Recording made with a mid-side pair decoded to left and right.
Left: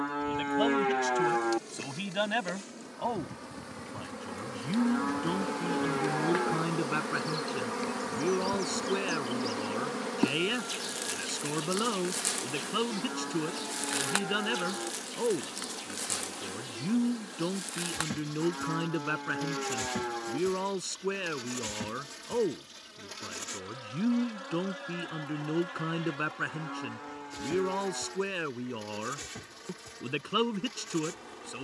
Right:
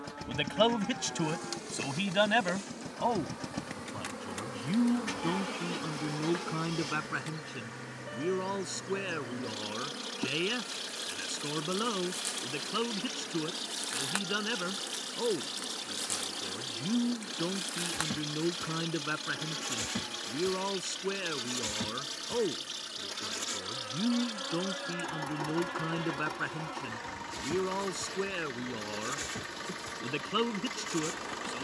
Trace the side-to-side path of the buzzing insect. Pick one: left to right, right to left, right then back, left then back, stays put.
left then back.